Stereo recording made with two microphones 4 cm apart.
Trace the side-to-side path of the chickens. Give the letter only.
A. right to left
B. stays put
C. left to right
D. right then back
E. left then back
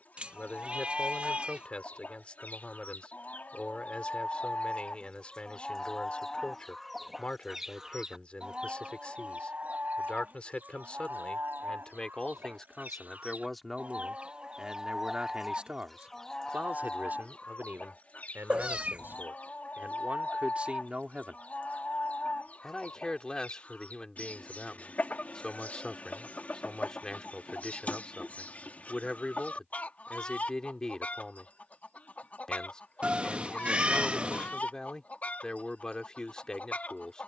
D.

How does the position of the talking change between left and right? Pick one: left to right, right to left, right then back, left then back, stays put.
right then back.